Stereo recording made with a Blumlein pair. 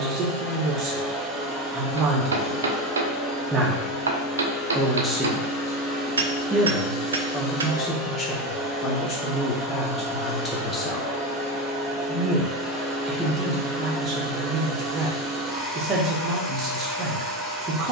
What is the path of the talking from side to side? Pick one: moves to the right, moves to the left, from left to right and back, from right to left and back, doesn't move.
from right to left and back.